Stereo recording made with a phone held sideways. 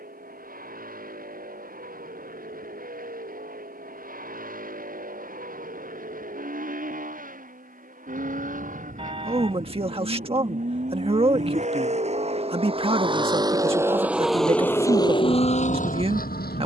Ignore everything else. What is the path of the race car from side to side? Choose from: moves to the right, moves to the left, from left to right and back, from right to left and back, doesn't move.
moves to the left.